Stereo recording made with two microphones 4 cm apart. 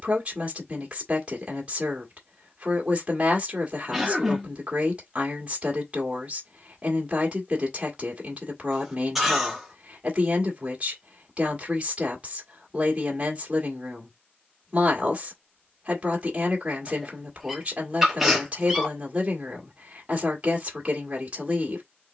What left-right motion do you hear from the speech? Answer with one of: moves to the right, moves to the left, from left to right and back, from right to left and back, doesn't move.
doesn't move.